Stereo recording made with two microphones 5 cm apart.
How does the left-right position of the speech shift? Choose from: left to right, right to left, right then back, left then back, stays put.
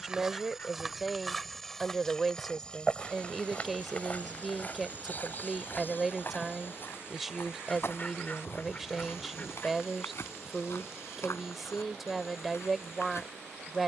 stays put.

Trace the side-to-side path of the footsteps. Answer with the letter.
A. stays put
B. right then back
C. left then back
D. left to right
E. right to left
E.